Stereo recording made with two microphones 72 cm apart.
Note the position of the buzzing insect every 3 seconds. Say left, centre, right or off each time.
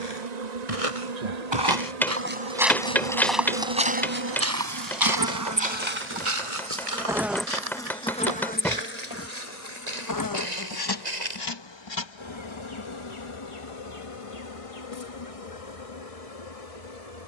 right, right, centre, left, left, left.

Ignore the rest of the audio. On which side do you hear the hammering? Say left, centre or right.
centre.